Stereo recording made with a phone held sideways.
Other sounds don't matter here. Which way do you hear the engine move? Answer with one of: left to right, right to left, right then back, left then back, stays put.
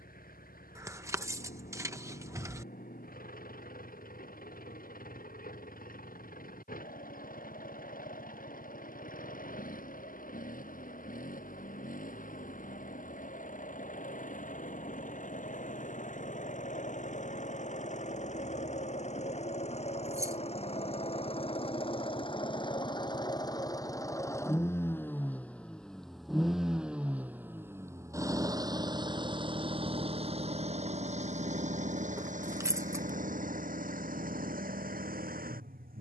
left to right.